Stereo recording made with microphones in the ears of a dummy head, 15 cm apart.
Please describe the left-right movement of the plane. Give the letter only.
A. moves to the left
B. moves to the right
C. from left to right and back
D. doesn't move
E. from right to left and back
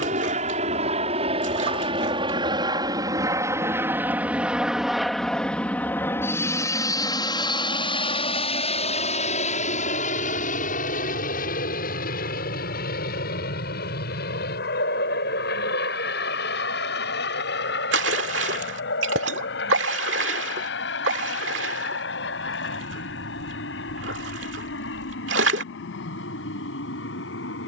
A.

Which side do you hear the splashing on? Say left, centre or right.
right.